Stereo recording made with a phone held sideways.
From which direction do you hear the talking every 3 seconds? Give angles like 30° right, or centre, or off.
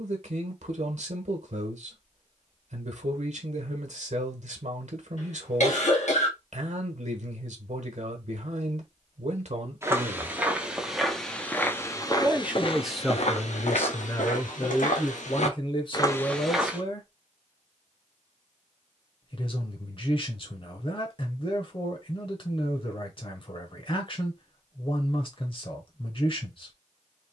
60° right, 60° right, 60° right, 60° right, 10° left, 40° left, 40° left, 40° left, 40° left.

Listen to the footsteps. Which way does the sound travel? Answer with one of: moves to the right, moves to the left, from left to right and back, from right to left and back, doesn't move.
from right to left and back.